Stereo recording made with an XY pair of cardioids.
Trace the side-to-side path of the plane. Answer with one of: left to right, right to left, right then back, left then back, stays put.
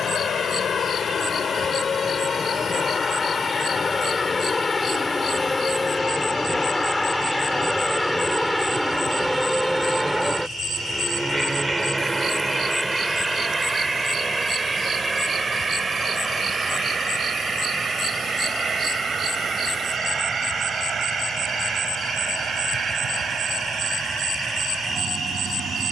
left to right.